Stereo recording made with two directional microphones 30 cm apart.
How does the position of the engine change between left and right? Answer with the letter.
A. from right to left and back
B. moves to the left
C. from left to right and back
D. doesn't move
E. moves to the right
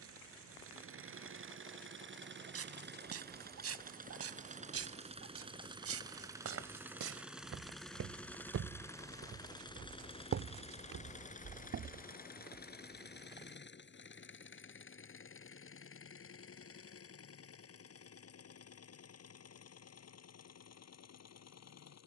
B.